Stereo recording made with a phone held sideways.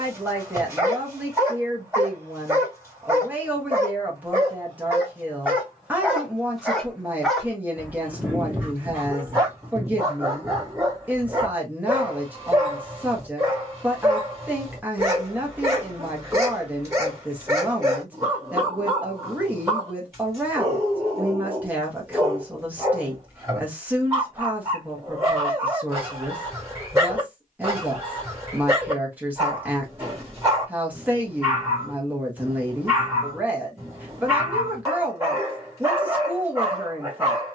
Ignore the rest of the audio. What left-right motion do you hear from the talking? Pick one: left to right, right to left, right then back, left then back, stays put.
stays put.